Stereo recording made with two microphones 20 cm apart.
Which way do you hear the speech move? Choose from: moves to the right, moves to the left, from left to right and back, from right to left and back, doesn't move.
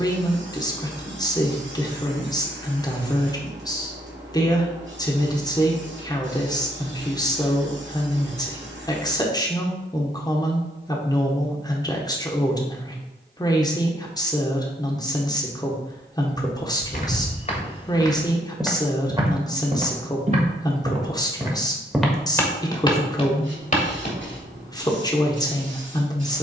doesn't move.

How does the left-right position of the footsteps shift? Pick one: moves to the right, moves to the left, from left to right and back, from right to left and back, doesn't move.
from left to right and back.